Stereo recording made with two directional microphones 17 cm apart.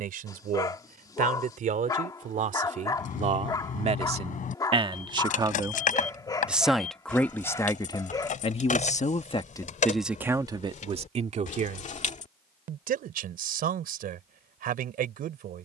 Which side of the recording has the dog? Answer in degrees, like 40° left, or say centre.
20° left.